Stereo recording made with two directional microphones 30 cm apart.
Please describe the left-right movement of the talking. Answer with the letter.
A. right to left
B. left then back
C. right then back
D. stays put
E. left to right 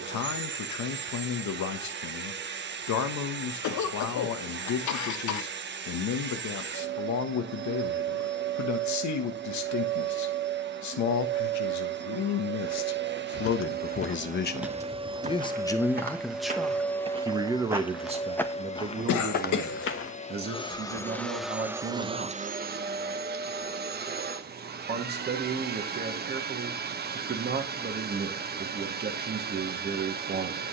E.